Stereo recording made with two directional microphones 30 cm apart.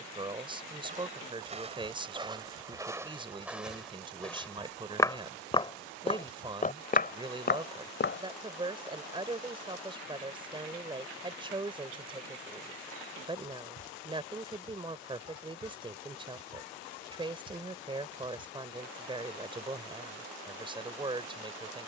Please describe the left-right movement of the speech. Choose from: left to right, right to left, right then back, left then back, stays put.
stays put.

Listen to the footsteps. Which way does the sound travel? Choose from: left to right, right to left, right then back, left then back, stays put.
right to left.